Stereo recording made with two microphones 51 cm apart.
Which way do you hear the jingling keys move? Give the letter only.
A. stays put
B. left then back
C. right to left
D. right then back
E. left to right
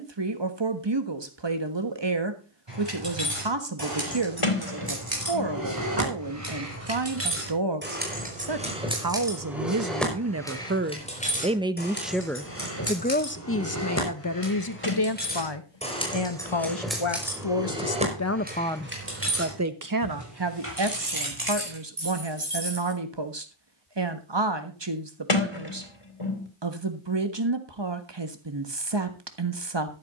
B.